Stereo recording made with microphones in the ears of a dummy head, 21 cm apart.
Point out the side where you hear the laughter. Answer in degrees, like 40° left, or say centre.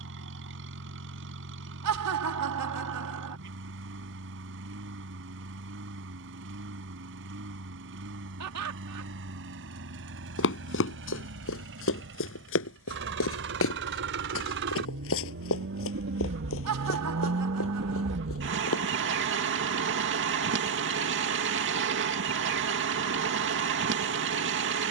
80° right.